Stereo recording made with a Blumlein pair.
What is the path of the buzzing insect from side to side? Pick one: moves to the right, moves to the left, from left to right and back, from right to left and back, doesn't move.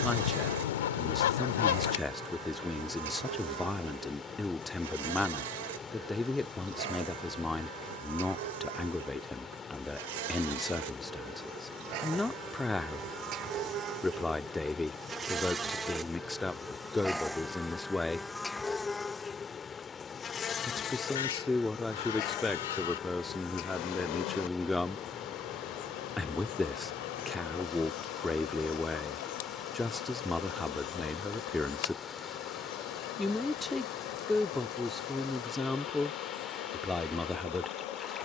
moves to the left.